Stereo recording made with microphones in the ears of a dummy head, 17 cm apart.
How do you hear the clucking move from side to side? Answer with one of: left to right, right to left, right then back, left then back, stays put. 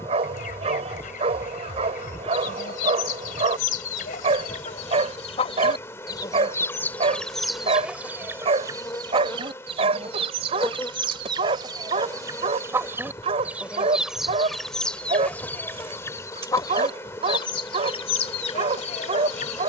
right then back.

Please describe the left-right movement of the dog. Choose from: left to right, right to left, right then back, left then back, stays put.
stays put.